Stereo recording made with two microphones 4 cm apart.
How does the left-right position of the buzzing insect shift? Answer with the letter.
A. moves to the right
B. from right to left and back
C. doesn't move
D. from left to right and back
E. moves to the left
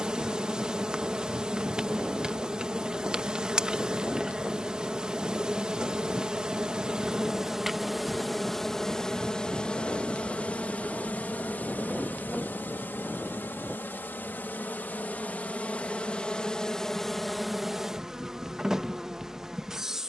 B.